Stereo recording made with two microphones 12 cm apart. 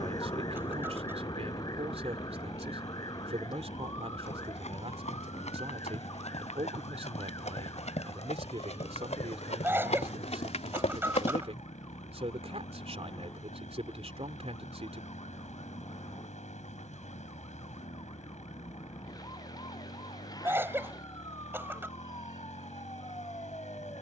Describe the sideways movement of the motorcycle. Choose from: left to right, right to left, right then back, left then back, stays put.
stays put.